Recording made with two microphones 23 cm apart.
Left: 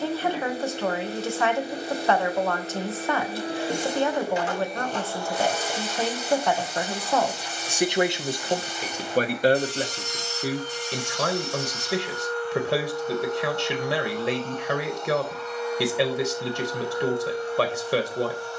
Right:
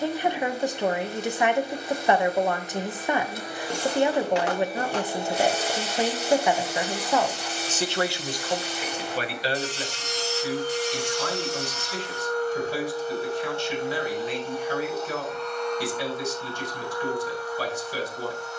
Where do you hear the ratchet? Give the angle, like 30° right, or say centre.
70° right.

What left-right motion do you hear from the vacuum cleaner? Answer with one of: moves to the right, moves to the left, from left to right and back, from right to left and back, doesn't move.
from left to right and back.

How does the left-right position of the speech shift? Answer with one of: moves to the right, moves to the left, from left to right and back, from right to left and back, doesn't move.
moves to the left.